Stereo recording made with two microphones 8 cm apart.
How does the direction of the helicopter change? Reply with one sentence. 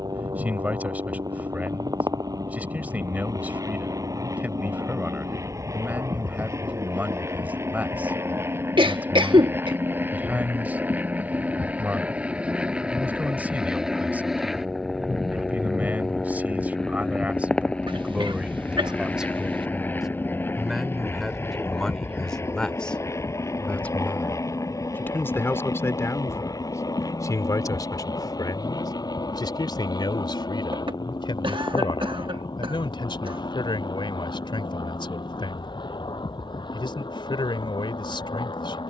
You can hear the helicopter travel towards the left.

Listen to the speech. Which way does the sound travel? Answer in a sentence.
You can hear the speech move to the left.